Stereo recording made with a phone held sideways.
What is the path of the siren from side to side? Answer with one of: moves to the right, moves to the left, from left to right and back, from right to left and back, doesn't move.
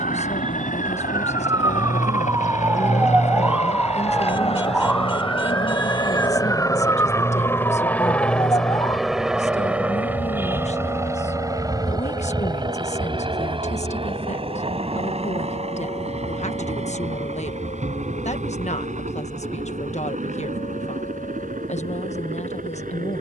moves to the left.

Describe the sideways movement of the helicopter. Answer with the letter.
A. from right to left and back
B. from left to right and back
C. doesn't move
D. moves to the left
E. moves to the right
E.